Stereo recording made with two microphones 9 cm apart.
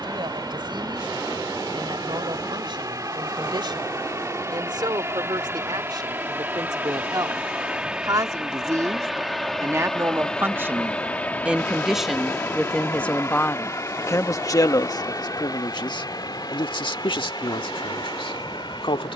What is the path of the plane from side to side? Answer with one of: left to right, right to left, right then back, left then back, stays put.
right to left.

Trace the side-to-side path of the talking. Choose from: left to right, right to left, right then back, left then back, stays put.
right to left.